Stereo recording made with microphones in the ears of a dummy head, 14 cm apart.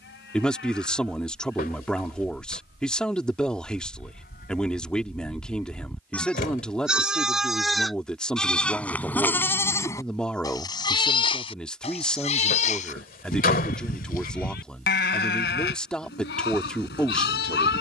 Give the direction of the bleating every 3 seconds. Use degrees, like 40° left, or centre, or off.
70° left, 50° left, centre, 20° left, 50° left, 70° left.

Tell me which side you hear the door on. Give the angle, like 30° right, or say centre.
60° left.